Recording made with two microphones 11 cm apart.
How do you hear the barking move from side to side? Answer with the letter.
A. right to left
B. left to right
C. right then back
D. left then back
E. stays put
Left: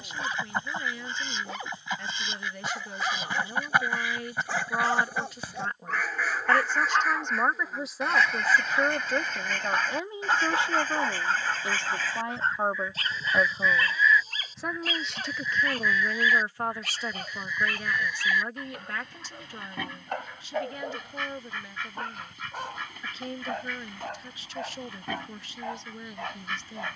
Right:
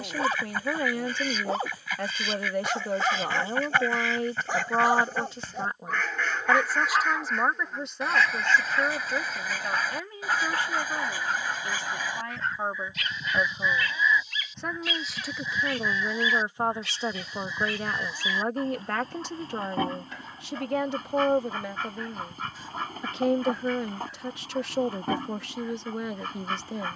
A.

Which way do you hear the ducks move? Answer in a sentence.
In this clip you hear the ducks travel towards the right.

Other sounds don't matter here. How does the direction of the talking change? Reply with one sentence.
In this clip you hear the talking move from right to left and back again.